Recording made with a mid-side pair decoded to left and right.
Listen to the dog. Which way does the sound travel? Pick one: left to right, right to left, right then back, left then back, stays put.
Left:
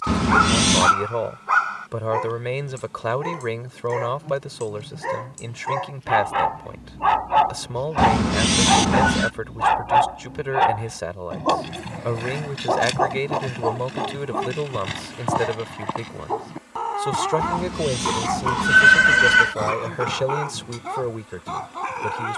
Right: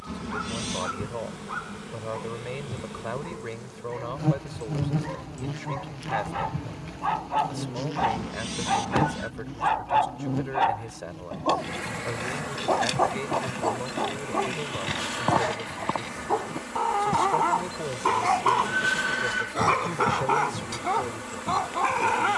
left to right.